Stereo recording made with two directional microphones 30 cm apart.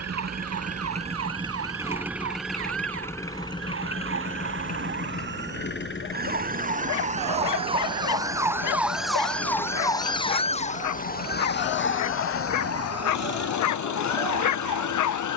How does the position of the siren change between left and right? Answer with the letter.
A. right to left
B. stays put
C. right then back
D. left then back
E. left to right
A.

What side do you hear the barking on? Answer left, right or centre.
left.